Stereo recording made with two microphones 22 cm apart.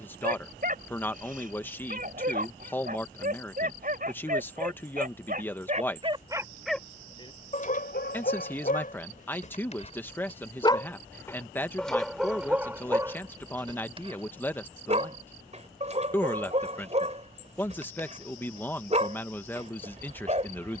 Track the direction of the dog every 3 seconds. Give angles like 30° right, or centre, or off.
40° right, 40° right, 30° left, 20° left, 10° right, 30° right, 30° right.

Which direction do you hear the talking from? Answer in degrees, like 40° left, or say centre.
10° left.